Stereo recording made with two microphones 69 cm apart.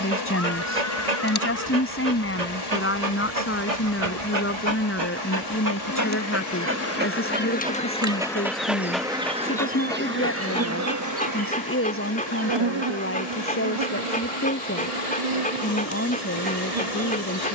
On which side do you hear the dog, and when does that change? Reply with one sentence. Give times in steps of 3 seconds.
You can hear the dog on the right from 0 s and in the centre from 6 s.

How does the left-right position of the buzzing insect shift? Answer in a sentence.
In this clip you hear the buzzing insect go from the left side to the right.